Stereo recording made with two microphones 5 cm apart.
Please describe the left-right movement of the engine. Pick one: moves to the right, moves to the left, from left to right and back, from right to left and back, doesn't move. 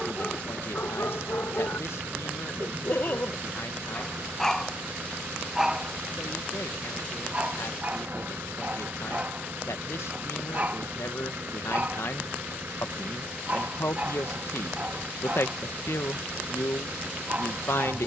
doesn't move.